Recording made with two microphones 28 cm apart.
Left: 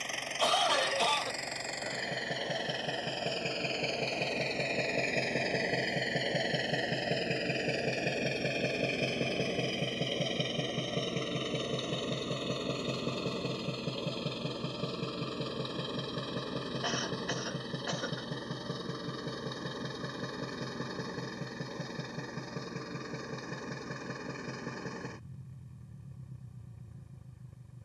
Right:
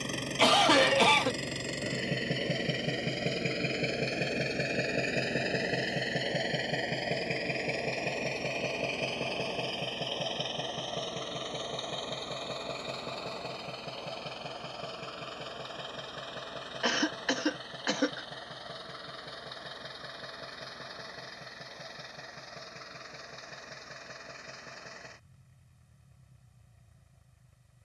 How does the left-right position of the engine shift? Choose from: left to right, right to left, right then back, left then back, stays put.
right to left.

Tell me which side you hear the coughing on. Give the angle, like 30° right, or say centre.
80° right.